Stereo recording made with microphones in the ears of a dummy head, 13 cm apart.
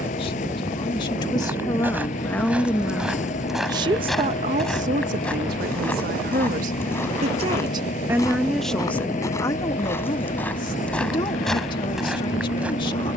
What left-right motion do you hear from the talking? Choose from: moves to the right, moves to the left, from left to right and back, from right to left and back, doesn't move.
from left to right and back.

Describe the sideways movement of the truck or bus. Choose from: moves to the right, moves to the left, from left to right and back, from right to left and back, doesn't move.
doesn't move.